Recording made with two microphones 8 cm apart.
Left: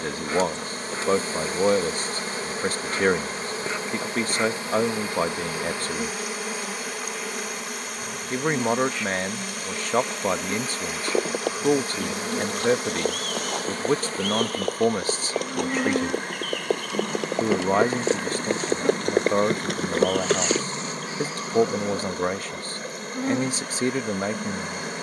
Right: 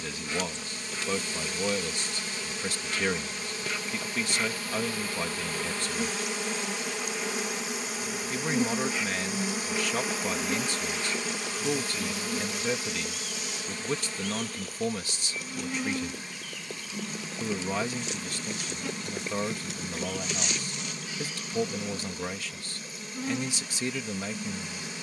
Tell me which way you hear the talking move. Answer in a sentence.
In this clip you hear the talking stay in one place.